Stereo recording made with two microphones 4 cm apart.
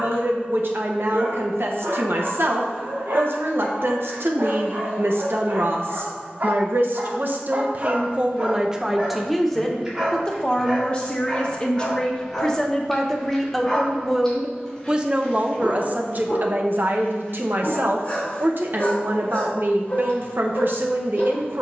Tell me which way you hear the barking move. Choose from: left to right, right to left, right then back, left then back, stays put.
right to left.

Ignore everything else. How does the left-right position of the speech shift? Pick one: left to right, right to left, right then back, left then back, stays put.
left then back.